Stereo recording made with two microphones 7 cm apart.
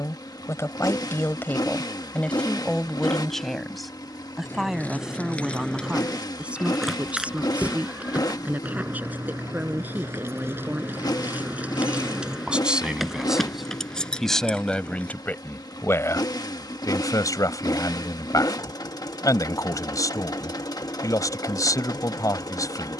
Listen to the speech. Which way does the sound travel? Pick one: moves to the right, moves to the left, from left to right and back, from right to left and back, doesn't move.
from left to right and back.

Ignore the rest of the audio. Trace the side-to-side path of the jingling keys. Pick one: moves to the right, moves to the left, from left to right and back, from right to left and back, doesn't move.
from left to right and back.